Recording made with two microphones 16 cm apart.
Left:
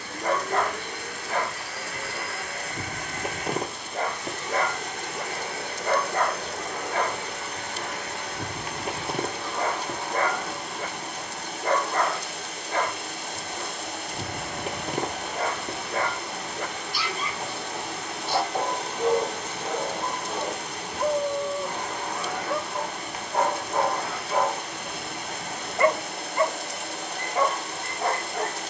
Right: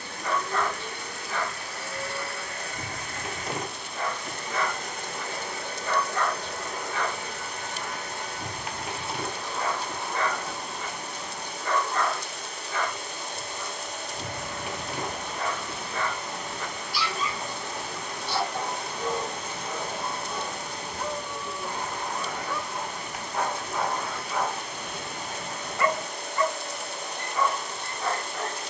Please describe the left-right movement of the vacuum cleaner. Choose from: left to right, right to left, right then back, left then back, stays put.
stays put.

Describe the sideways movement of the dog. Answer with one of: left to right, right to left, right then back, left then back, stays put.
stays put.